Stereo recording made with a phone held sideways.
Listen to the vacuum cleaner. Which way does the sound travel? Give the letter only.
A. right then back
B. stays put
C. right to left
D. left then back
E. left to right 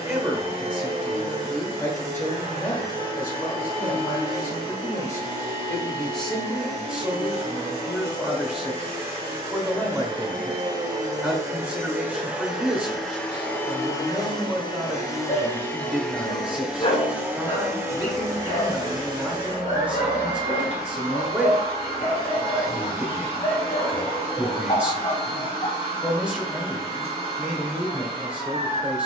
D.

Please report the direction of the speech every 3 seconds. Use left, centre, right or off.
centre, left, centre, centre, centre, centre, centre, centre, centre, centre.